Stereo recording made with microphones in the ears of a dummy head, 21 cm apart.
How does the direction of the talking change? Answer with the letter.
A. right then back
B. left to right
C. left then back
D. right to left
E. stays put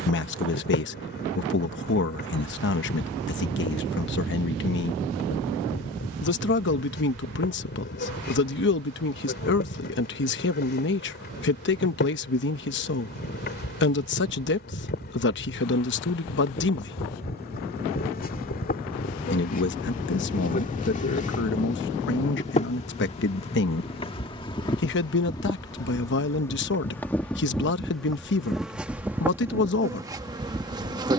E.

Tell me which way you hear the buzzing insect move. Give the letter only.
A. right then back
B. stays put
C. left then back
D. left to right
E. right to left
D.